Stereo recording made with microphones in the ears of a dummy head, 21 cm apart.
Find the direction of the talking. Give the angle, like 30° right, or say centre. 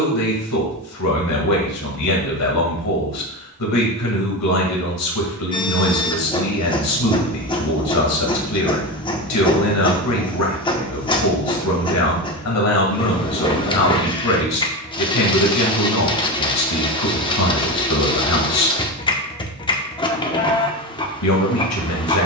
80° left.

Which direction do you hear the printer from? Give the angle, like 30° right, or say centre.
20° left.